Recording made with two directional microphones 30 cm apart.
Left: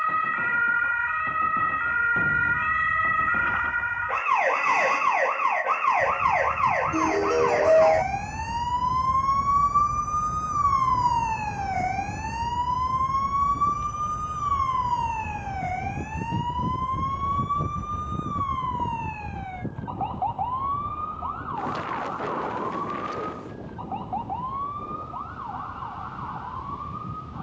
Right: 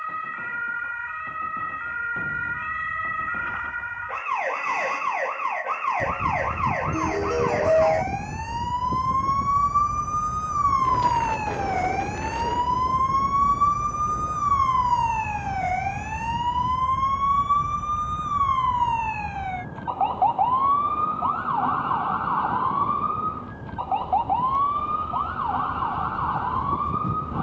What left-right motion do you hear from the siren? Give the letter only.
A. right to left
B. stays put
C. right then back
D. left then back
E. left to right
E.